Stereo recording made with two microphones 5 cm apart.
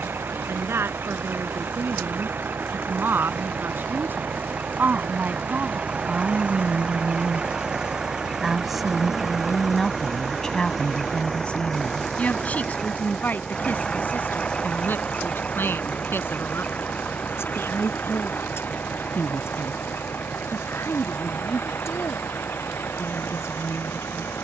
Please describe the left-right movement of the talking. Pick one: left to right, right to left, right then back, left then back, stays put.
right to left.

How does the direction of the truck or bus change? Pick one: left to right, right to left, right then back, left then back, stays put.
right to left.